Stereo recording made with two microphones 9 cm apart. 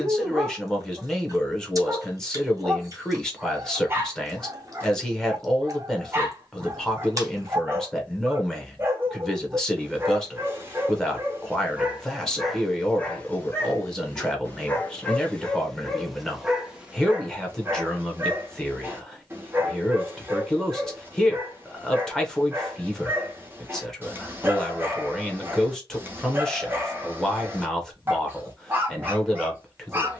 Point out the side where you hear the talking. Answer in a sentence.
In this clip you hear the talking in the centre.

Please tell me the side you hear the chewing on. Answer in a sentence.
You can hear the chewing on the right.